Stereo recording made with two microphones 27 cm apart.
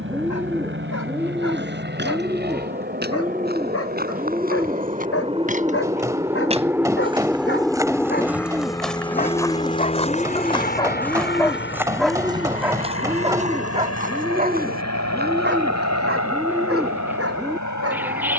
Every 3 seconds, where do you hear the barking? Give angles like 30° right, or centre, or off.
60° left, 60° left, 40° left, 20° left, 20° right, 50° right.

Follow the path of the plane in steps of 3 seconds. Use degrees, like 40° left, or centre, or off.
40° right, 30° right, centre, 30° left, 50° left, 60° left.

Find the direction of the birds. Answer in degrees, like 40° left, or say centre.
10° right.